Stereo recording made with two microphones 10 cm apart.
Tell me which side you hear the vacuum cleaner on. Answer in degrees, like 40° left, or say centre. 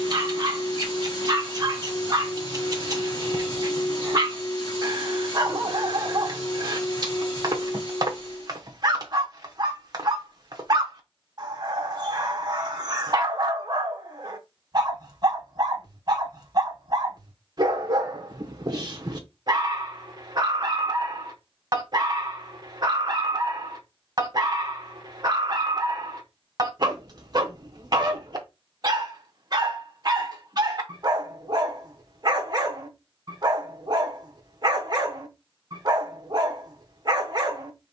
40° left.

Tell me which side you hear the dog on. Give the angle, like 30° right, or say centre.
40° right.